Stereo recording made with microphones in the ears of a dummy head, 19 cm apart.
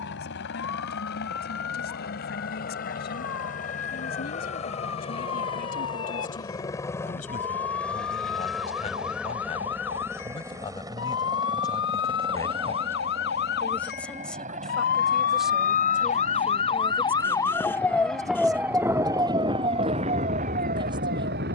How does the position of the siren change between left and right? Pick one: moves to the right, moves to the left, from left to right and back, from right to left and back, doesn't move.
moves to the right.